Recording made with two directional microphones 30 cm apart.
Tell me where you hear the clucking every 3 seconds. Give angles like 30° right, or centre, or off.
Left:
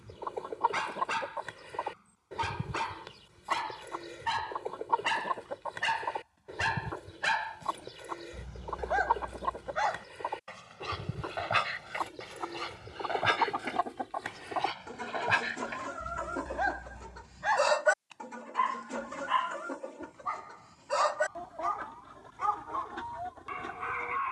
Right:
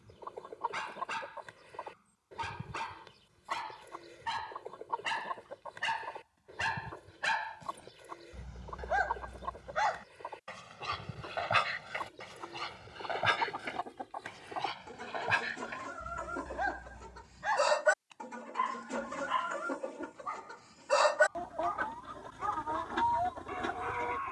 50° left, 50° left, 50° left, 50° left, 40° left, 20° left, 10° right, 40° right.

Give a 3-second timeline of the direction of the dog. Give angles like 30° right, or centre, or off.
40° left, 30° left, 20° left, centre, 10° left, 20° left, 30° left, 40° left.